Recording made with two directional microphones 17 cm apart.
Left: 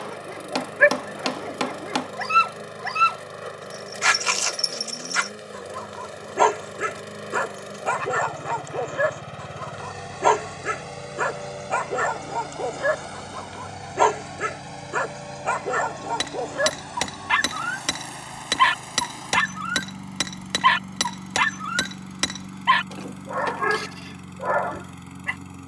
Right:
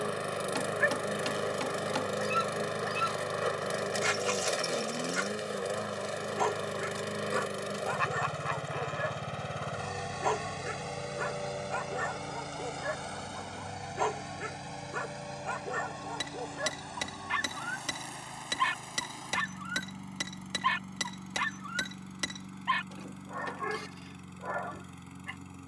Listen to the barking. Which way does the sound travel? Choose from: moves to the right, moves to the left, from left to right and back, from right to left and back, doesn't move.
doesn't move.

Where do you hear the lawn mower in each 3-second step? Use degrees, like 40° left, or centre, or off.
20° right, 20° right, 10° right, 10° left, 20° left, 30° left, 40° left, 40° left, 40° left.